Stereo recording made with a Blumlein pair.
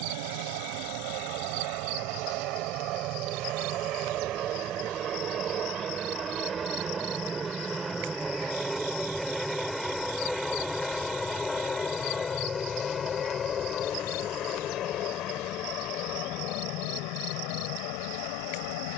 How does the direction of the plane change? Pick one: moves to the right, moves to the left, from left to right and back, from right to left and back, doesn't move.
moves to the left.